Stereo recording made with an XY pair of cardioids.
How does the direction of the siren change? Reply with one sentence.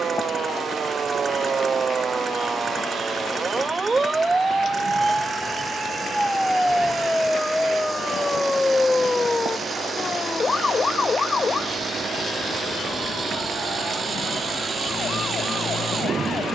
You can hear the siren move to the left.